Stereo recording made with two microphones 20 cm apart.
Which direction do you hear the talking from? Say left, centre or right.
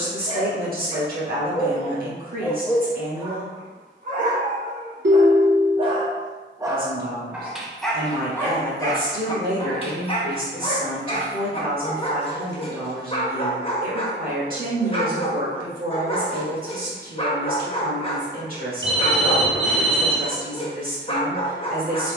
right.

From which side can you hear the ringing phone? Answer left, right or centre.
right.